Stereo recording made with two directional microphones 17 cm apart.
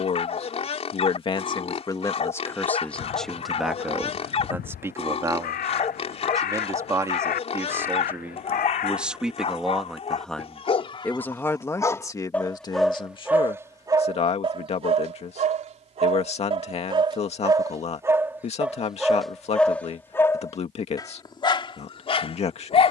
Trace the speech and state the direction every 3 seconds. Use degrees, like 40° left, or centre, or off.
20° left, 10° right, 10° right, centre, 30° left, 40° left, 40° left, 40° left.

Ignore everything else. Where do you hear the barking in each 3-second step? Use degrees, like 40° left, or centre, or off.
40° left, 40° left, 40° left, 30° left, 10° right, 30° right, centre, 30° left.